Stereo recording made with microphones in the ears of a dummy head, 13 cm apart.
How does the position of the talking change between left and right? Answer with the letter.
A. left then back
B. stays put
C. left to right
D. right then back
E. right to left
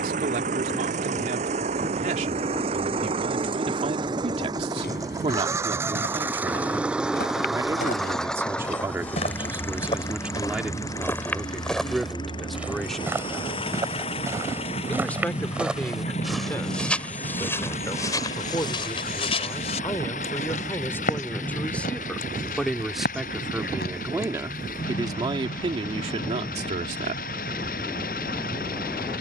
A.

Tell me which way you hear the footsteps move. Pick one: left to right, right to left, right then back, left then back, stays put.
right then back.